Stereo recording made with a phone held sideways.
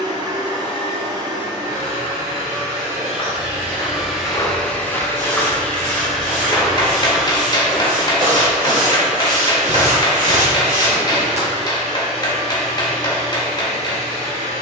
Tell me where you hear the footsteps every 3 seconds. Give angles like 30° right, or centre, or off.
off, 20° left, 20° right, 50° right, off.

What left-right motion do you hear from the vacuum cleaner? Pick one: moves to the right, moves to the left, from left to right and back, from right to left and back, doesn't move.
from right to left and back.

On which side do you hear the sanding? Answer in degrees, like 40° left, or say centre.
90° right.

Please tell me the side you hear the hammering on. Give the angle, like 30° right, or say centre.
30° left.